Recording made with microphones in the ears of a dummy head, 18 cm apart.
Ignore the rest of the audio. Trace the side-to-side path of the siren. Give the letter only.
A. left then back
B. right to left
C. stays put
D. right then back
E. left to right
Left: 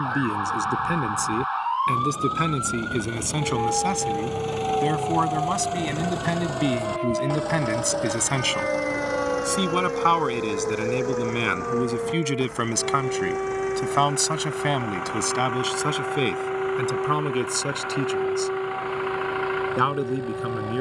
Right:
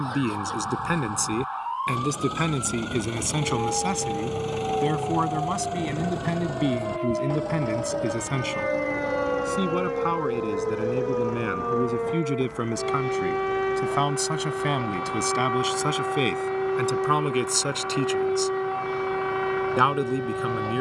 E.